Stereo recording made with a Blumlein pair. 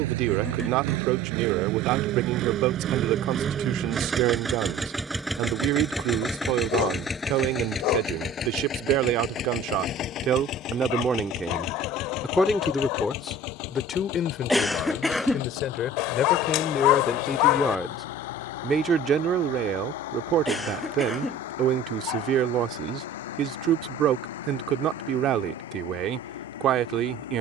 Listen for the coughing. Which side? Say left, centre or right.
centre.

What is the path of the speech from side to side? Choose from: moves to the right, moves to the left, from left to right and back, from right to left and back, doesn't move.
from right to left and back.